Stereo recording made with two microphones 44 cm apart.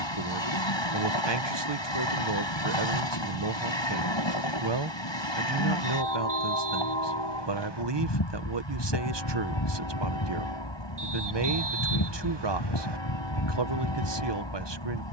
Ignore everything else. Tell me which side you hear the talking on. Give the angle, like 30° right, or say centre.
60° right.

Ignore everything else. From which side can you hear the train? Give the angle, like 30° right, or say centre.
70° left.